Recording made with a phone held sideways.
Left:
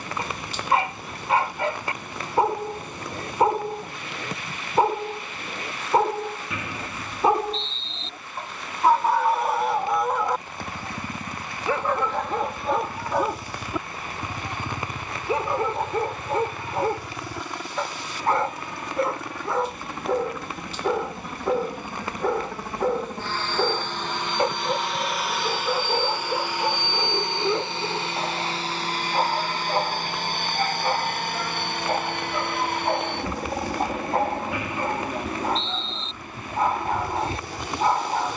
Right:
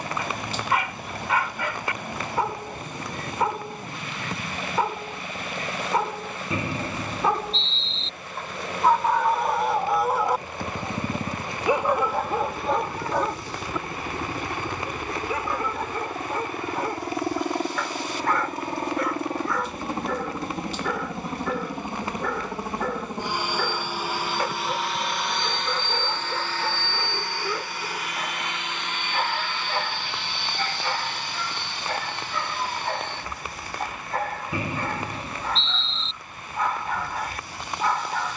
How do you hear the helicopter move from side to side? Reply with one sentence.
In this clip you hear the helicopter move to the left.